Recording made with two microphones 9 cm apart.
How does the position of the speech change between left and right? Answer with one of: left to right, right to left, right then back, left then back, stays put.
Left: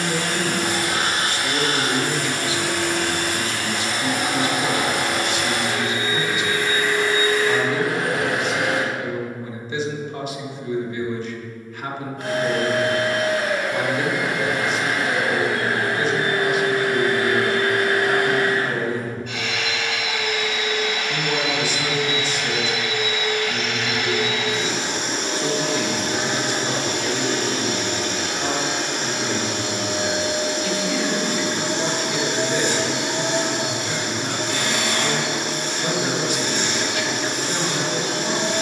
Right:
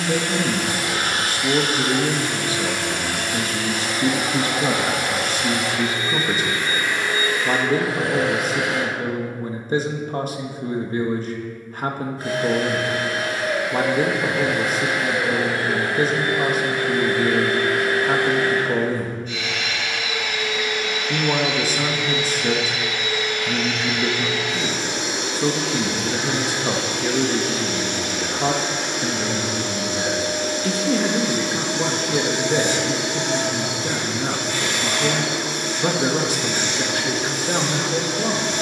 stays put.